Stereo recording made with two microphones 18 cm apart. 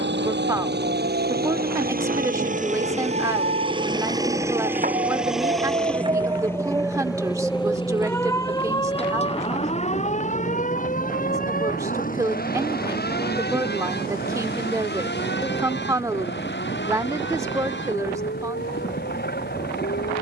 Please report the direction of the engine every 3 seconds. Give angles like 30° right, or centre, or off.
50° right, 10° right, 20° left, 40° left, 50° left, 50° left, 60° left.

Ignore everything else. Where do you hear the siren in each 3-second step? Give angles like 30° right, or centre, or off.
70° right, 50° right, centre, 40° left, 50° left, 60° left, 70° left.